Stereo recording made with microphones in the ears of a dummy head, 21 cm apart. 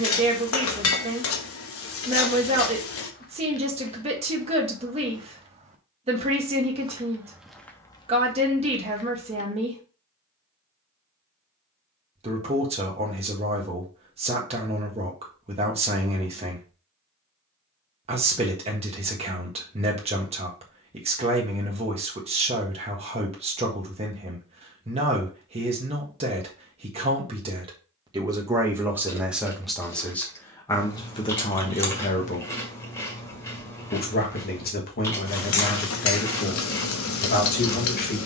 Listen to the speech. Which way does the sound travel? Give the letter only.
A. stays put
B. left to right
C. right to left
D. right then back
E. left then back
C.